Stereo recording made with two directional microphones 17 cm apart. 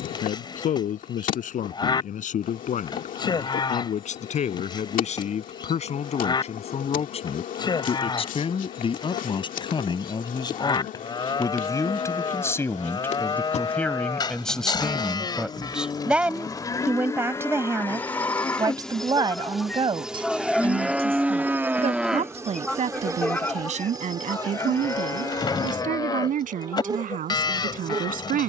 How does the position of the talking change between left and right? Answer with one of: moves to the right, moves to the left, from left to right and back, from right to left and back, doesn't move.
moves to the right.